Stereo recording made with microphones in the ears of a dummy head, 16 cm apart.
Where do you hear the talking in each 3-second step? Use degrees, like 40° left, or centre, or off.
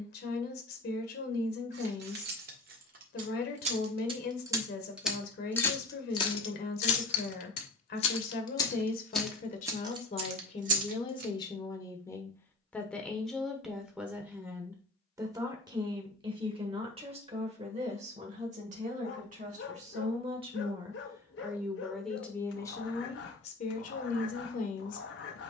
50° left, 50° left, 50° left, 30° left, centre, 30° right, 40° right, 10° left, 40° left.